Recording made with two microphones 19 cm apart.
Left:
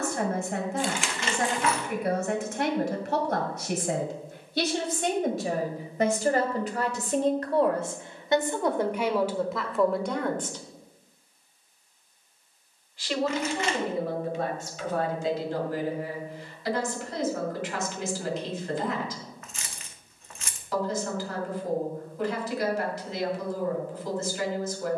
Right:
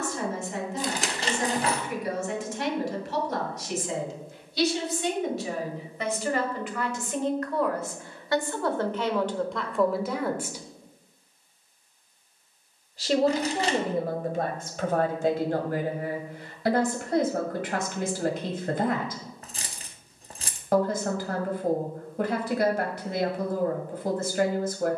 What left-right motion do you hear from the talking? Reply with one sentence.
In this clip you hear the talking travel towards the right.